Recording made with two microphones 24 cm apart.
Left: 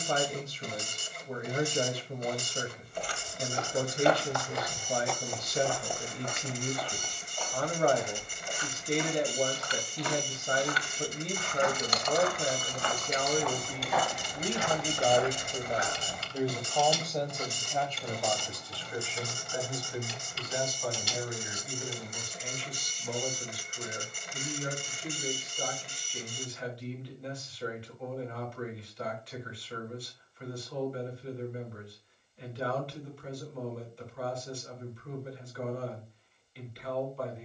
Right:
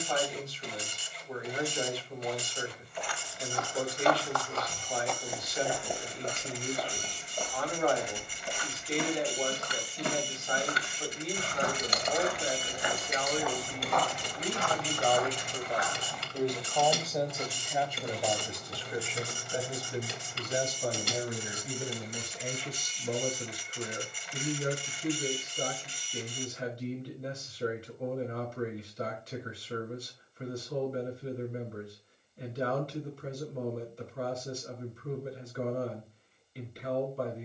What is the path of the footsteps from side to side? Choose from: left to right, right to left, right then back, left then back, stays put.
right then back.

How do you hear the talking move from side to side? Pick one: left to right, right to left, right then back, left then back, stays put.
left to right.